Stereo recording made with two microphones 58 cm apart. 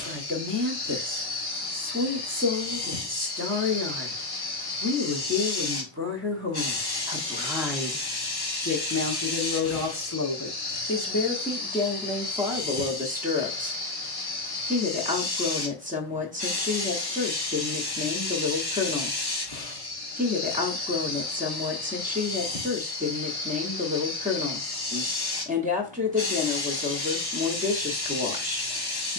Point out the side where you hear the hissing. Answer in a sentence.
In this clip you hear the hissing on the left.